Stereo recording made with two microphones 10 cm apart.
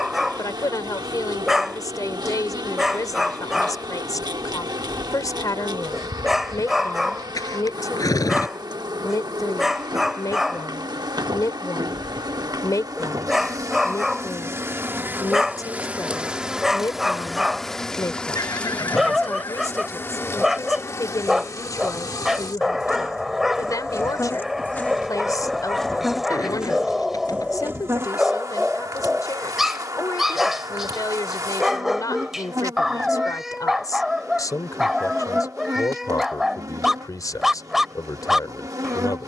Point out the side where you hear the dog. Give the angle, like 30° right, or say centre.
centre.